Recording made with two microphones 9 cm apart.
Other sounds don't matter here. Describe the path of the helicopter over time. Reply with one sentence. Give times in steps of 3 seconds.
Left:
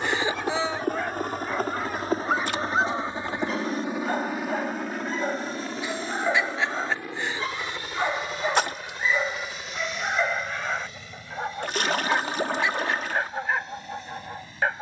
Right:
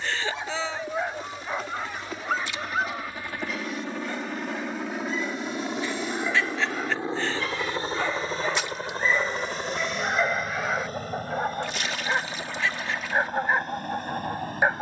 In this clip you hear the helicopter on the left from 0 s, in the centre from 3 s and on the right from 6 s.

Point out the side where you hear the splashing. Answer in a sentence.
You can hear the splashing on the left.